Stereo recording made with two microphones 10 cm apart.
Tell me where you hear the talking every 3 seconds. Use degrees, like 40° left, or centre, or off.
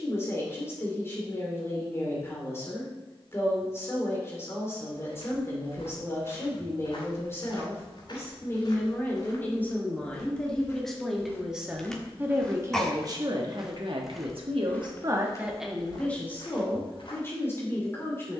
20° left, 20° left, 20° left, 10° left, 40° right, 10° left.